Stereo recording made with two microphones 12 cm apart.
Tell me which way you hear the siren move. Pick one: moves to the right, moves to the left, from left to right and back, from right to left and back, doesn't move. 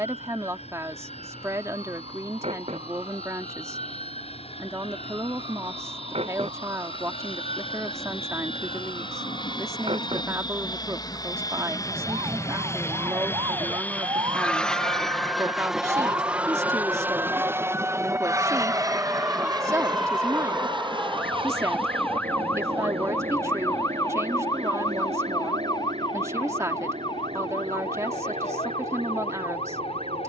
moves to the left.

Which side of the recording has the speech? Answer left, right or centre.
right.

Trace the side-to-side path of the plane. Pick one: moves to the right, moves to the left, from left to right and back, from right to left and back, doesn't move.
moves to the right.